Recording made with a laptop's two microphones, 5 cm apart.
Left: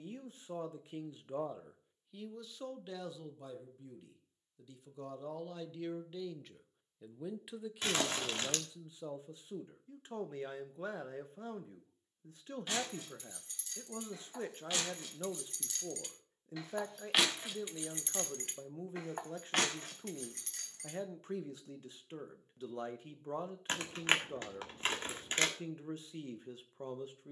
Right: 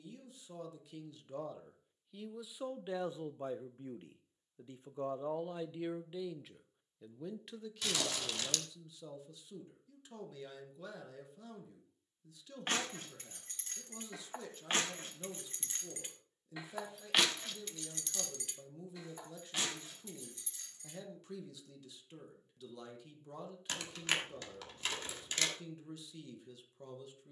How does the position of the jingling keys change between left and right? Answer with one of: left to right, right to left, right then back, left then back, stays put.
right to left.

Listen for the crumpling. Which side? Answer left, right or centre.
left.